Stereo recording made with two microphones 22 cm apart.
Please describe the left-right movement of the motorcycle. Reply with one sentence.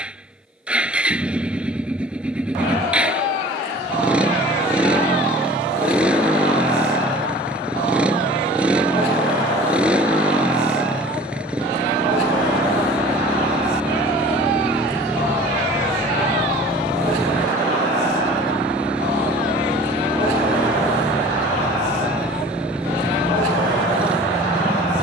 In this clip you hear the motorcycle stay put.